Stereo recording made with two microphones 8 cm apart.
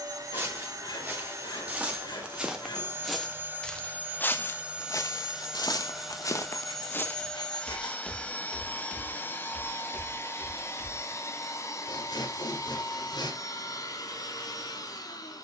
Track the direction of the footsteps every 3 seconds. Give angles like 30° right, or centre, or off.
20° right, 30° left, 20° left, 20° right, off.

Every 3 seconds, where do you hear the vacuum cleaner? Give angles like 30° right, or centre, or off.
40° right, 20° right, 10° left, 30° left, 50° left.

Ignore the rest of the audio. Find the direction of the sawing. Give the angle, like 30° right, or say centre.
70° left.